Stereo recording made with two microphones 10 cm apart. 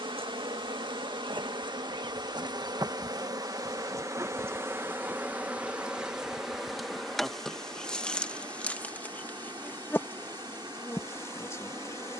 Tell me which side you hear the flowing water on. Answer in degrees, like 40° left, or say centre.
50° right.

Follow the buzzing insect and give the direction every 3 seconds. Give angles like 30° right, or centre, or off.
60° right, 30° right, centre, 20° left.